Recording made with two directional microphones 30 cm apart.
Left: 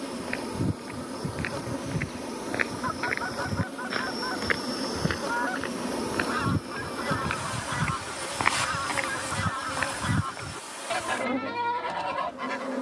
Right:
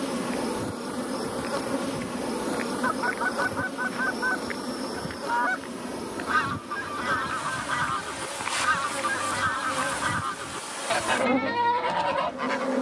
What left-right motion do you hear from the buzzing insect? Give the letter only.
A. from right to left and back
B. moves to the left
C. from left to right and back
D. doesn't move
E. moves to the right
A.